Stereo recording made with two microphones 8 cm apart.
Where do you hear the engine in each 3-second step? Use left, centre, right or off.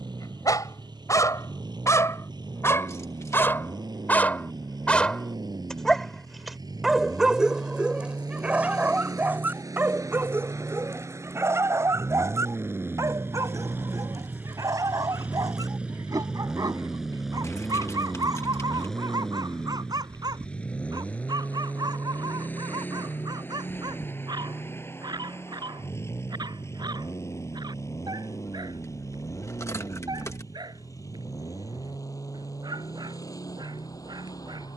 right, right, right, right, right, centre, centre, left, left, left, left, left.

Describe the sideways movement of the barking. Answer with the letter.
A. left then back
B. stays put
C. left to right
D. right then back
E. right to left
C.